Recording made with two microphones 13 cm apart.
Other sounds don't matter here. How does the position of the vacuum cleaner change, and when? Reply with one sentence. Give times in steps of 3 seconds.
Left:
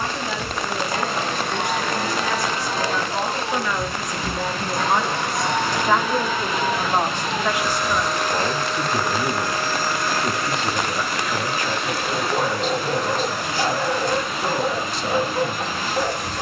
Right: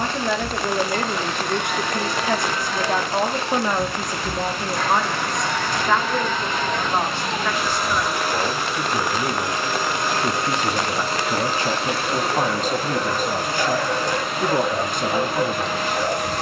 In this clip you hear the vacuum cleaner on the left from 0 s, in the centre from 6 s and on the right from 9 s.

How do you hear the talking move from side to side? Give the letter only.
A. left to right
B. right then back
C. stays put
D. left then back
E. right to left
D.